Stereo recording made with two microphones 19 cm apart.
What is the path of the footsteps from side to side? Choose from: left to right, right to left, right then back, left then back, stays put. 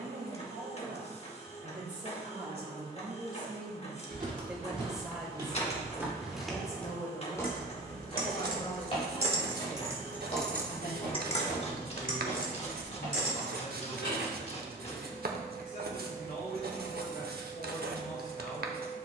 right to left.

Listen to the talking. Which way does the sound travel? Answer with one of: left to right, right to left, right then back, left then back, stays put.
right to left.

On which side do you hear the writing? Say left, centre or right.
right.